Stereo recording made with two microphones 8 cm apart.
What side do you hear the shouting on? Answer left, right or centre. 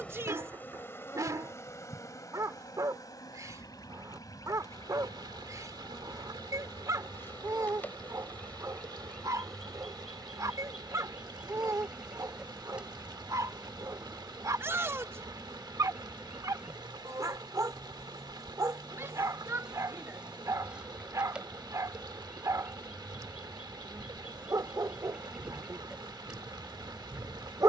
right.